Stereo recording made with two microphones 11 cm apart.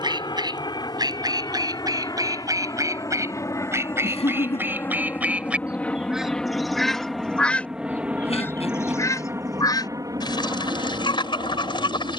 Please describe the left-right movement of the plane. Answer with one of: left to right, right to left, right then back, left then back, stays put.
left to right.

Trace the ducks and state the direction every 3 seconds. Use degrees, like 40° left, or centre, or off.
30° right, 20° right, 10° left, 40° left.